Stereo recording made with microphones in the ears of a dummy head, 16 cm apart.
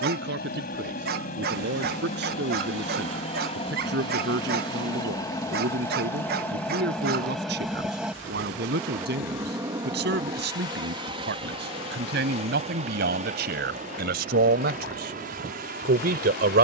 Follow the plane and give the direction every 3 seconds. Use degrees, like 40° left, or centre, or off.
40° left, 20° left, centre, 20° right, 40° right, 40° right.